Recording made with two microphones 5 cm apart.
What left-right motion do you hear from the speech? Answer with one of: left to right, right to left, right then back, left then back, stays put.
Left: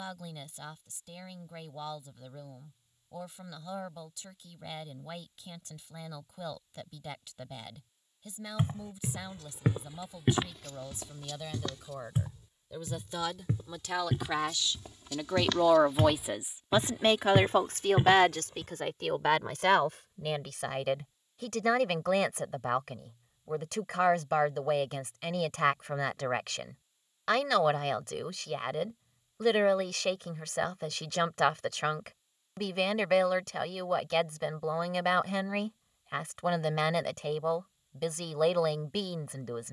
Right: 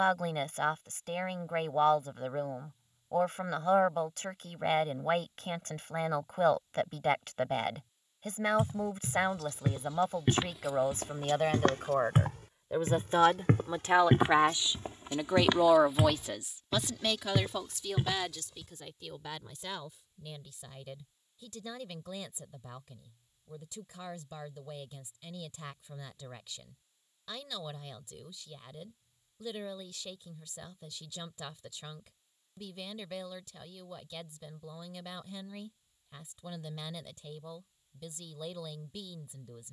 right to left.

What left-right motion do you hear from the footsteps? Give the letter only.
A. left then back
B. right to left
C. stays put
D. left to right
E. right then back
E.